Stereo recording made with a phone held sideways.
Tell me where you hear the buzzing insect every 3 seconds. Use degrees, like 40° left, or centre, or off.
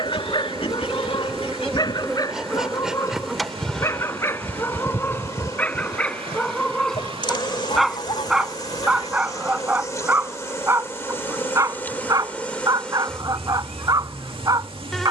centre, 10° left, 30° left, 20° left, 10° left.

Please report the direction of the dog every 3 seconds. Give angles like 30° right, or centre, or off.
30° left, 20° left, centre, 20° right, 30° right.